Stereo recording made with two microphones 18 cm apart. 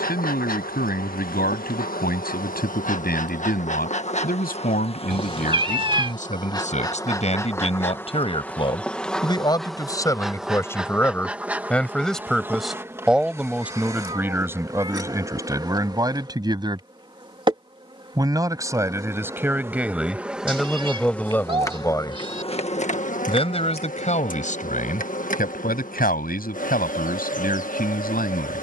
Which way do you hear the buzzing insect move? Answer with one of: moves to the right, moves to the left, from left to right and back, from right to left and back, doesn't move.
from left to right and back.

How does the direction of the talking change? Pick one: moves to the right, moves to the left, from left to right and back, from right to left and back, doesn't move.
from left to right and back.